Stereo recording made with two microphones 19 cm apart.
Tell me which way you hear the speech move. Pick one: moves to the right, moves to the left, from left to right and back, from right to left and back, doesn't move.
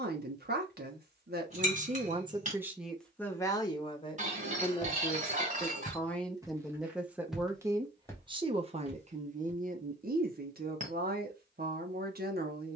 from right to left and back.